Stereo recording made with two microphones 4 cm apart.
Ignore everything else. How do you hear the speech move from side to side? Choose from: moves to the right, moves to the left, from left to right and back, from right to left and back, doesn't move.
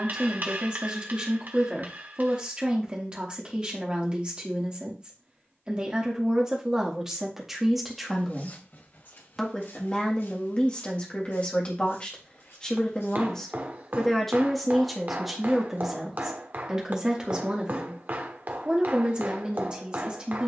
from right to left and back.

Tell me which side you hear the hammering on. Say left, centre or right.
right.